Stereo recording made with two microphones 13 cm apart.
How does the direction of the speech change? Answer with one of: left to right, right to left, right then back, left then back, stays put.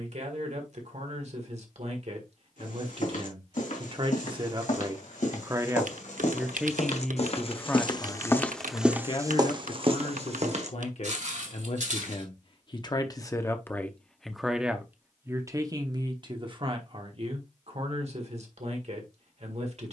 left then back.